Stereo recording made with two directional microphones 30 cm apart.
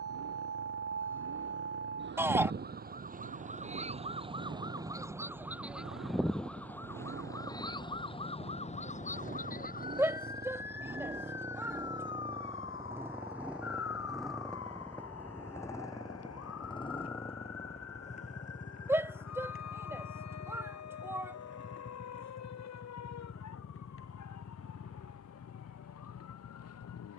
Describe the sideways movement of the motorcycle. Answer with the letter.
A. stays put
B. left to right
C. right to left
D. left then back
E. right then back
C.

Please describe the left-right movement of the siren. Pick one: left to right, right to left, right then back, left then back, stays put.
right to left.